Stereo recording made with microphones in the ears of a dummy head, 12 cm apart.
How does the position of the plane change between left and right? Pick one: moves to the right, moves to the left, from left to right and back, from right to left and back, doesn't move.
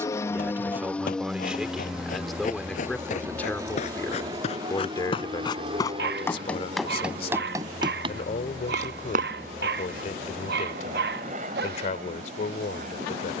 moves to the right.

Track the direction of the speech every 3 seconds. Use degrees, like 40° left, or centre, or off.
10° right, 20° left, 40° left, 50° left, 50° left.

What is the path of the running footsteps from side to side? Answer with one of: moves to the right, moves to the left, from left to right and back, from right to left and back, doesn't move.
moves to the right.